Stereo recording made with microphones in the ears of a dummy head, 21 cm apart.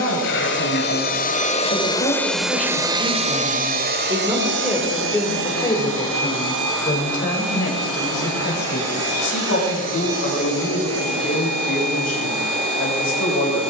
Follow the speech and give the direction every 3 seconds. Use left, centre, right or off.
left, centre, left, left, left.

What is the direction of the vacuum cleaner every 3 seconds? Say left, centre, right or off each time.
left, right, right, right, right.